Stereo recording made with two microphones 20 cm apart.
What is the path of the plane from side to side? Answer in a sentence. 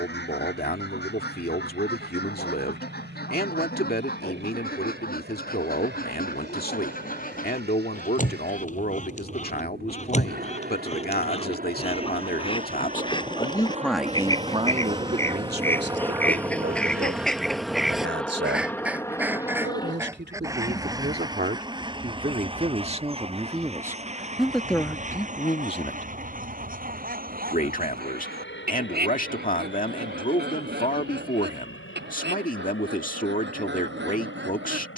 In this clip you hear the plane travel towards the left.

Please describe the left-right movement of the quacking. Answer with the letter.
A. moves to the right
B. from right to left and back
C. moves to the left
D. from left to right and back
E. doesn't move
A.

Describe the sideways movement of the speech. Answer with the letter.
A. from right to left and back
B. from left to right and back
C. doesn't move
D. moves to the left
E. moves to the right
B.